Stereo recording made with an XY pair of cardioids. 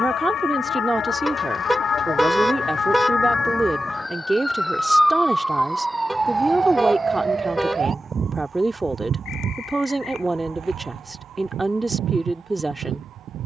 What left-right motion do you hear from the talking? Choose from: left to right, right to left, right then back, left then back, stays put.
stays put.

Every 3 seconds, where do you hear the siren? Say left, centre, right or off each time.
left, centre, right, right, right.